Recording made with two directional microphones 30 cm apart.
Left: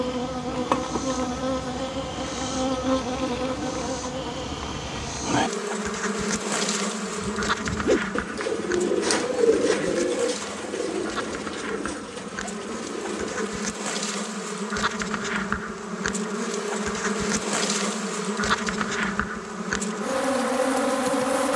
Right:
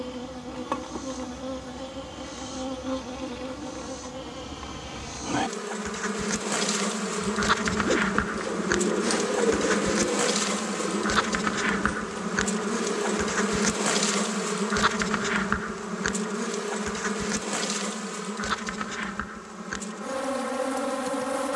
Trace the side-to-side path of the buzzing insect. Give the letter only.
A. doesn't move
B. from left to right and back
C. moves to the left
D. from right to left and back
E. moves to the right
B.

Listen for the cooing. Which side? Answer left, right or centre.
left.